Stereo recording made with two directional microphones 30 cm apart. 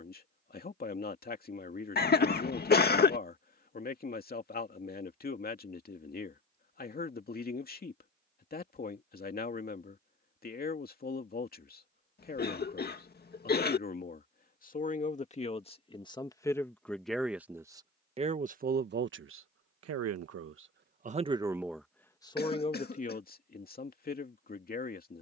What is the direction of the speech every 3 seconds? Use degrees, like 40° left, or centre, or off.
30° left, 30° left, 30° left, 30° left, 30° left, 10° left, 40° right, 10° left, 30° left.